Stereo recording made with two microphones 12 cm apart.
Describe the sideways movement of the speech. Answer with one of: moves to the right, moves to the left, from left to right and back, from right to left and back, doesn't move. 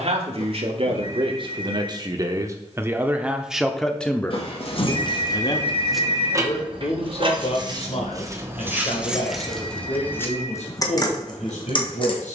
moves to the left.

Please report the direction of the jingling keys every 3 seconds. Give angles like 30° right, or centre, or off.
off, 30° left, 30° right, 20° left.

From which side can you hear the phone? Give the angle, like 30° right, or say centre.
50° left.